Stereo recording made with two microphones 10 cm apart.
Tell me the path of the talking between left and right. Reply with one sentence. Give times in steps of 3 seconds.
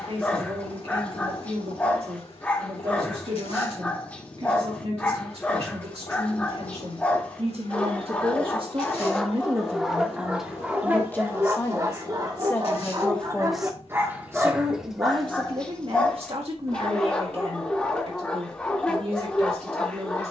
In this clip you hear the talking on the right from 0 s, in the centre from 9 s and on the right from 15 s.